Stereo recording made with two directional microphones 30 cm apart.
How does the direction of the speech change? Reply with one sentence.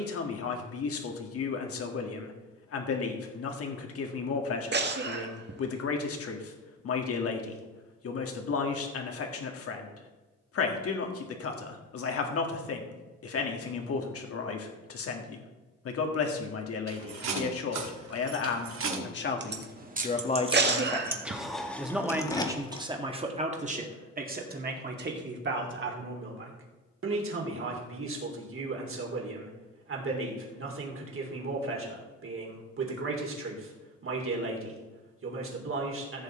In this clip you hear the speech travel towards the right.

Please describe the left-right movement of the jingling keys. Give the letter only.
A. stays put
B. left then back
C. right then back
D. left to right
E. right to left
E.